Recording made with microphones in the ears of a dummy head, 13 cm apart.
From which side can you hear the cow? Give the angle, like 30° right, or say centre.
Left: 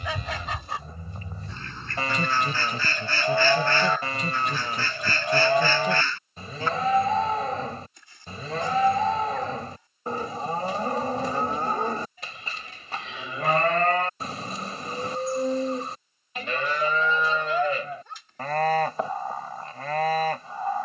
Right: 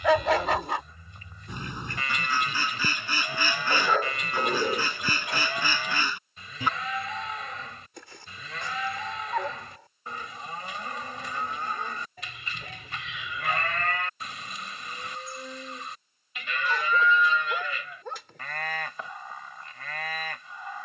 30° left.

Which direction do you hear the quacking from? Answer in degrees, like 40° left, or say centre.
10° right.